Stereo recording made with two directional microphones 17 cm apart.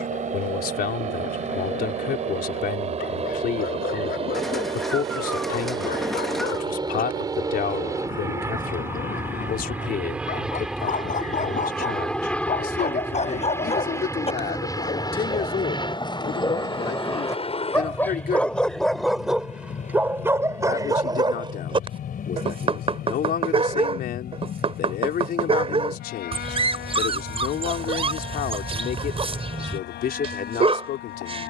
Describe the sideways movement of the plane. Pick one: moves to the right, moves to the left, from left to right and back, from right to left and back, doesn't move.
moves to the left.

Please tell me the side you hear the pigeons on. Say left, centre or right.
centre.